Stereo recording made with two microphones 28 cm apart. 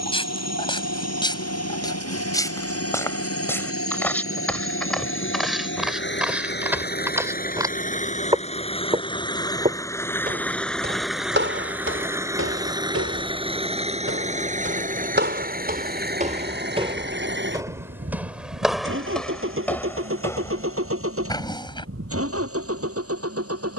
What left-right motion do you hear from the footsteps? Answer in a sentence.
You can hear the footsteps go right and come back.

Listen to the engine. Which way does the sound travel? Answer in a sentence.
In this clip you hear the engine travel towards the right.